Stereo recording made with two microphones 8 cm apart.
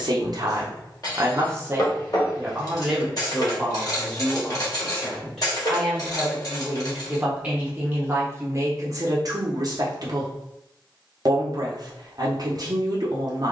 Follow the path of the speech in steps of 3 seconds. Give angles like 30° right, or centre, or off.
30° right, centre, 20° right, 50° right, 50° right.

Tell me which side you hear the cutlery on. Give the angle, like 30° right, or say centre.
50° left.